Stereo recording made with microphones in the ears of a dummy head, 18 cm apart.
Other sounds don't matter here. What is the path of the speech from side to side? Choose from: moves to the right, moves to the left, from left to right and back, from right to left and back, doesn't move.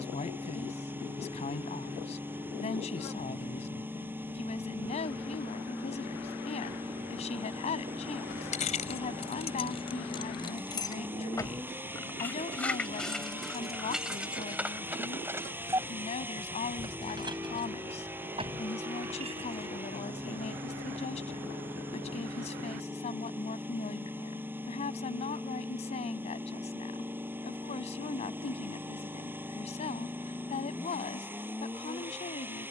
doesn't move.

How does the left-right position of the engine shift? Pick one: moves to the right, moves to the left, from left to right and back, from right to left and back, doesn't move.
doesn't move.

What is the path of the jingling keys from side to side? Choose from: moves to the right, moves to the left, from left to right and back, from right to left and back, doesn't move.
moves to the right.